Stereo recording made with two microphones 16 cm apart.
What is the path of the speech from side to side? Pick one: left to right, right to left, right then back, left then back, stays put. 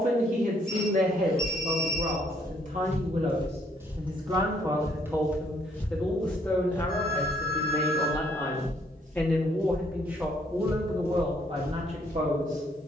left then back.